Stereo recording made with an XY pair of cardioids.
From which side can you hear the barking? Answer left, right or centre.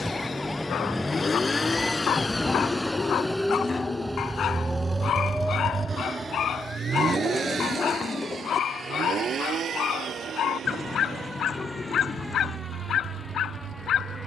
left.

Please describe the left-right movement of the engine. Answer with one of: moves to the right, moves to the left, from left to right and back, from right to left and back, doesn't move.
moves to the right.